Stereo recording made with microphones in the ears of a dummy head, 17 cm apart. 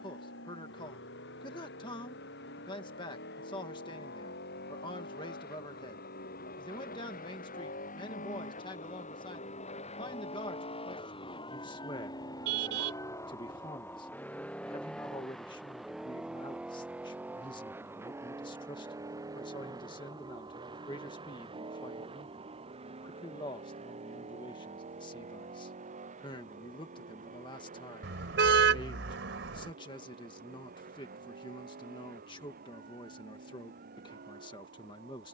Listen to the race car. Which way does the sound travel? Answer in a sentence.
In this clip you hear the race car travel towards the right.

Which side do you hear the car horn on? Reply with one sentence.
In this clip you hear the car horn on the right.